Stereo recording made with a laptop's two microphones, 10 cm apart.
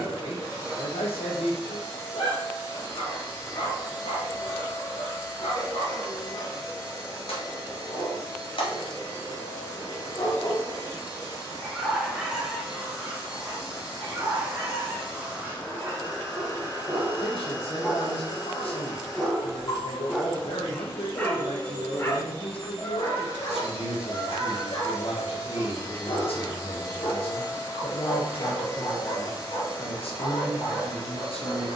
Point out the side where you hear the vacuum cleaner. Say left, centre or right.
left.